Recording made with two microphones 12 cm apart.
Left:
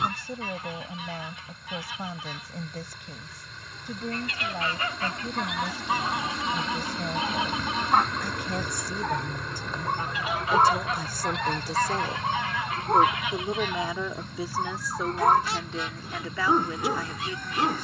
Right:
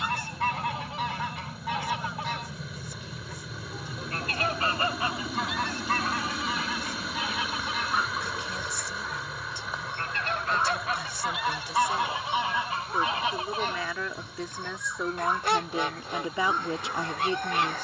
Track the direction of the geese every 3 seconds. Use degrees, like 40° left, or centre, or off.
70° right, 30° right, 30° left, centre, 30° right, 60° right.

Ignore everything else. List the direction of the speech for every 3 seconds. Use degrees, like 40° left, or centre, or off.
60° left, 60° left, 60° left, 50° left, 20° left, 20° right.